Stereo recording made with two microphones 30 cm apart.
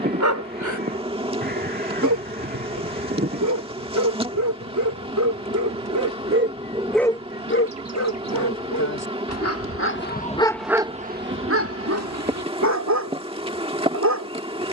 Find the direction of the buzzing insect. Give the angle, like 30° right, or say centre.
20° right.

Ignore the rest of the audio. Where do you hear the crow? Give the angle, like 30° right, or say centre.
30° right.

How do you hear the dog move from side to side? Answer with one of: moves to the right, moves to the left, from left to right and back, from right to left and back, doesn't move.
from right to left and back.